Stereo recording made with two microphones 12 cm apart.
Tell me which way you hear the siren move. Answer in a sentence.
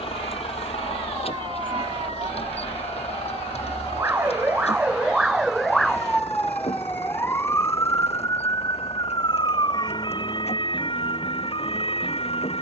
In this clip you hear the siren travel towards the left.